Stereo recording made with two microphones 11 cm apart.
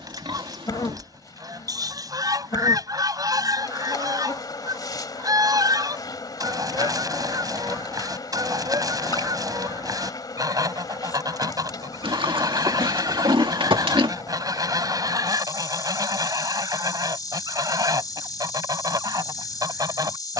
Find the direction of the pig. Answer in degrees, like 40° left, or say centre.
50° right.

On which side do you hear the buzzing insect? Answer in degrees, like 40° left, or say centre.
40° left.